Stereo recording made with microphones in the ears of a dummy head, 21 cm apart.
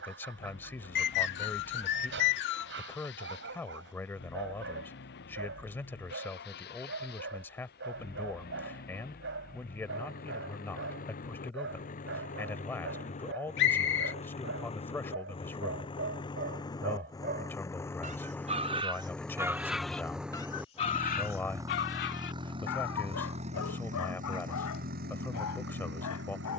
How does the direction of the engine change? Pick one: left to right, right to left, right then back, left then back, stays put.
left to right.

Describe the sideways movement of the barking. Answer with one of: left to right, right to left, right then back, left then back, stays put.
right to left.